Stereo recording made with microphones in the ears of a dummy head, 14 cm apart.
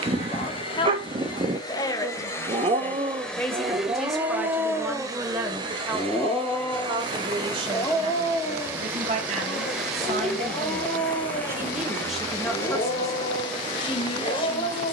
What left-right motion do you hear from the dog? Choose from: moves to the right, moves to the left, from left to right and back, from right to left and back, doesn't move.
moves to the left.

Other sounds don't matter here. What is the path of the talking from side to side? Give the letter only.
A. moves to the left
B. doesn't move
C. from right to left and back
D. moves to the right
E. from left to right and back
E.